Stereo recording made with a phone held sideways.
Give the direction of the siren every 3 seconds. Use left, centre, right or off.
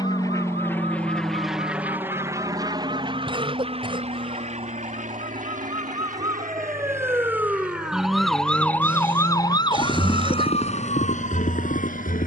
right, right, centre, left.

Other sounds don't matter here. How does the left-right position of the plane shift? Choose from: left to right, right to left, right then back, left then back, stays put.
left to right.